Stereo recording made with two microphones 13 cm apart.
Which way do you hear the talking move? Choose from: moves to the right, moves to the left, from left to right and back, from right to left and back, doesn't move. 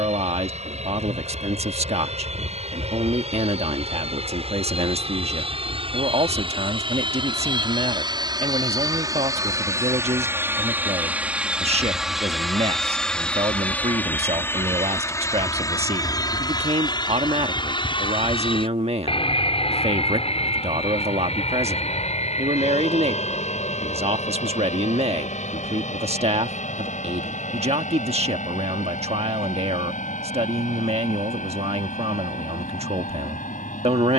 doesn't move.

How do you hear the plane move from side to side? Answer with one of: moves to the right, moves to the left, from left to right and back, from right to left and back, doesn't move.
moves to the left.